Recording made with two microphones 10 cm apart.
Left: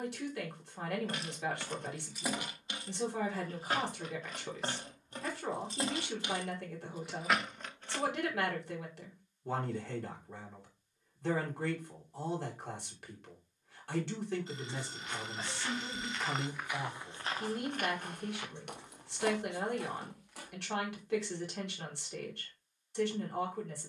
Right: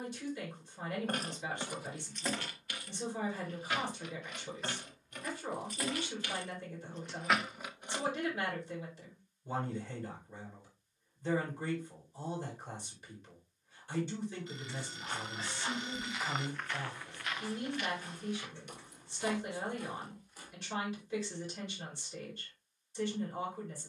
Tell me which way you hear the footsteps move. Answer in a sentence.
In this clip you hear the footsteps go from the right side to the left.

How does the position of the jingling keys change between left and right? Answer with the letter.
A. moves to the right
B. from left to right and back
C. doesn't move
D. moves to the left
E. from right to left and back
E.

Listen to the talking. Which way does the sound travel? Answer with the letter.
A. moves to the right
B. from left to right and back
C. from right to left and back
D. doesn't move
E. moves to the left
D.